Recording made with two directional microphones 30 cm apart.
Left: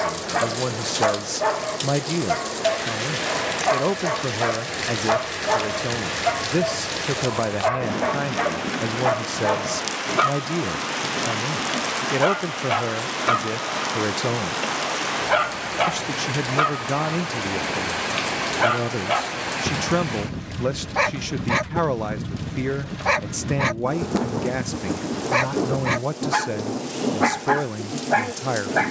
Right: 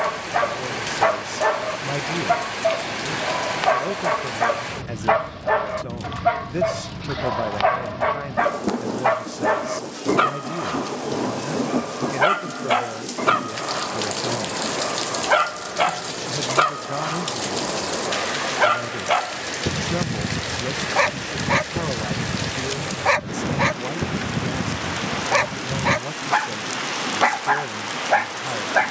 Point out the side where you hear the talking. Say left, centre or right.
left.